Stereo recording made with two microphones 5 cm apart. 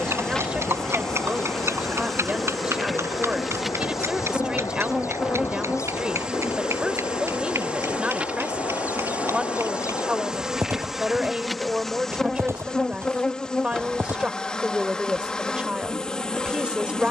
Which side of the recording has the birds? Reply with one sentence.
You can hear the birds on the left.